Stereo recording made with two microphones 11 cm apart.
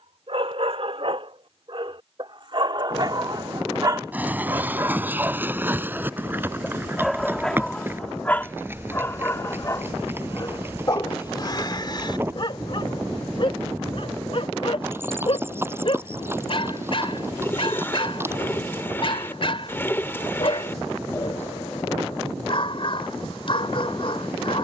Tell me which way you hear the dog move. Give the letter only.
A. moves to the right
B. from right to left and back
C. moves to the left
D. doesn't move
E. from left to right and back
C.